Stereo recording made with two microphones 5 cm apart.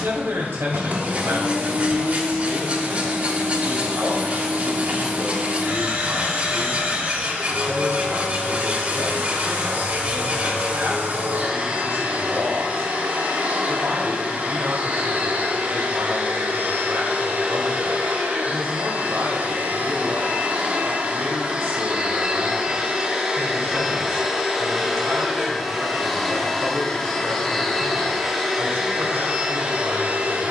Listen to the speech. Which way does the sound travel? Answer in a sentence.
You can hear the speech stay put.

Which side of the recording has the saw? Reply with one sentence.
You can hear the saw on the right.